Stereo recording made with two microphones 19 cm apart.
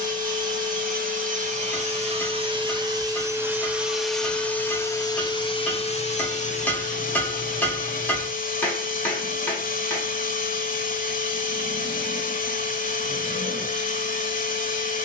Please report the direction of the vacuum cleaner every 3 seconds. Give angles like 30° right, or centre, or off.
40° right, 10° left, 40° left, 50° left, 50° left.